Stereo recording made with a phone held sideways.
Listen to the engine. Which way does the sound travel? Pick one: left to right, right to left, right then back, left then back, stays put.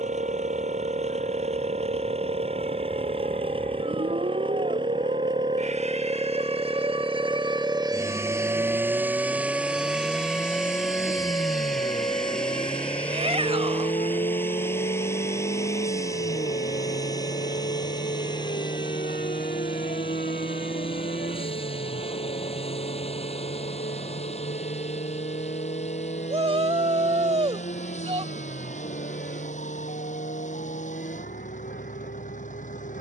right to left.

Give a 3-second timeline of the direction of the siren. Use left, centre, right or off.
right, right, right, centre, left, left, left, left, left, left, left.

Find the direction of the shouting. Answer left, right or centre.
right.